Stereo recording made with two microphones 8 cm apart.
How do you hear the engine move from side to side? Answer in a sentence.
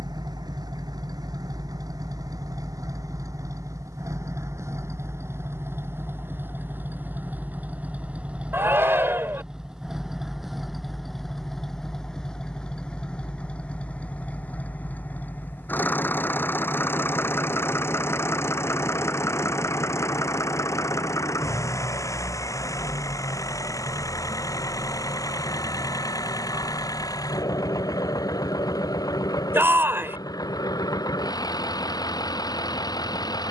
In this clip you hear the engine travel towards the left.